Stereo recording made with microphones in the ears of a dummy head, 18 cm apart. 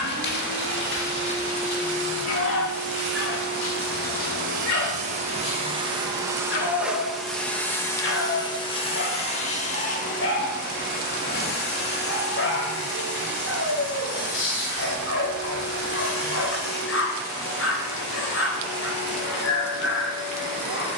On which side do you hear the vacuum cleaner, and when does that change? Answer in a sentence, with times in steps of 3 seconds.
You can hear the vacuum cleaner on the right from 0 s, in the centre from 6 s and on the left from 9 s.